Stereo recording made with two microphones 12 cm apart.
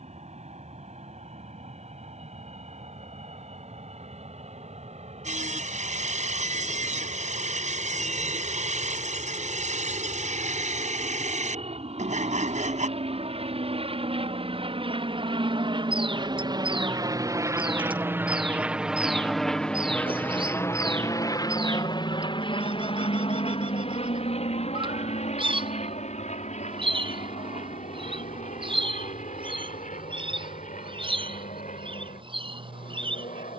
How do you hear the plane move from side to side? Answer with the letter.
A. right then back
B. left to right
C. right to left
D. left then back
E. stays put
C.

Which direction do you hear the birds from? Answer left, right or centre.
right.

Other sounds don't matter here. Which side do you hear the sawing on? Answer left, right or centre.
right.